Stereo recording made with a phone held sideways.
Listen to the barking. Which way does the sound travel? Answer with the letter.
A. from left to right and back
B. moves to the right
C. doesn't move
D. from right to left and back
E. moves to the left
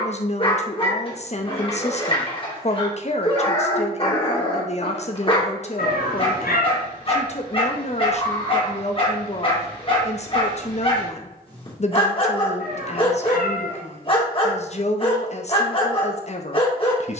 C.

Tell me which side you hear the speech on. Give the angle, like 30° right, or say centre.
40° left.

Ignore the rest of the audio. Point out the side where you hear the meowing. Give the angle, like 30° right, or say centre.
70° left.